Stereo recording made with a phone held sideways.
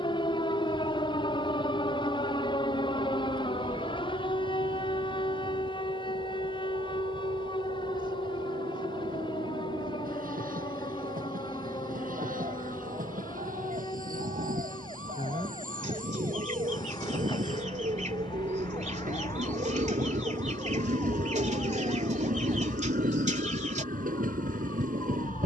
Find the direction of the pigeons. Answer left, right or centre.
right.